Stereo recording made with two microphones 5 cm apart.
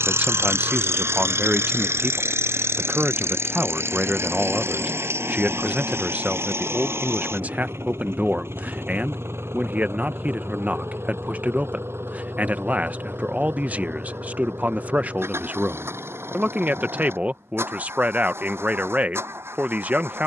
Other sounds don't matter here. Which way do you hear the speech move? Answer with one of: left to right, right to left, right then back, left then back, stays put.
stays put.